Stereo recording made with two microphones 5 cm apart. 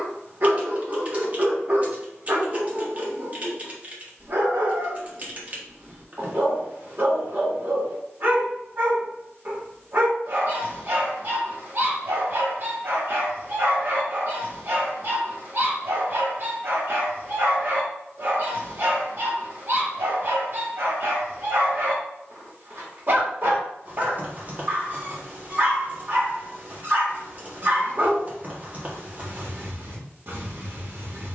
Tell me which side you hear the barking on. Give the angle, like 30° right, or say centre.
50° right.